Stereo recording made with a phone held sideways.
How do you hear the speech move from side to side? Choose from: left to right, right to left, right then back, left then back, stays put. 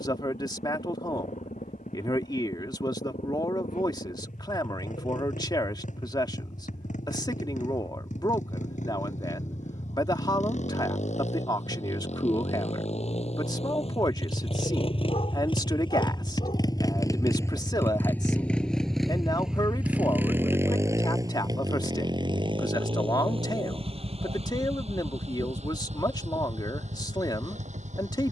stays put.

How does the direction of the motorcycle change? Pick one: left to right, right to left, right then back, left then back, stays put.
left to right.